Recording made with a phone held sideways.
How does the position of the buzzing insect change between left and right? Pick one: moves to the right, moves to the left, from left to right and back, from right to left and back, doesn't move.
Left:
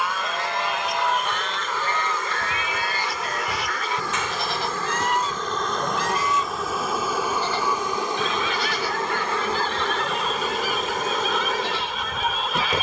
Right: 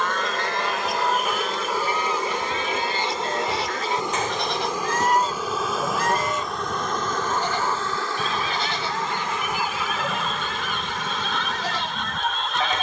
moves to the left.